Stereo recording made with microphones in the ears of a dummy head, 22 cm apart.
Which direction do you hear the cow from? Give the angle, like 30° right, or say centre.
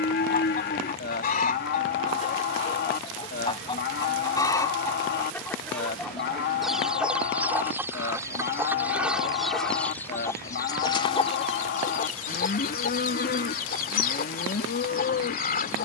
40° left.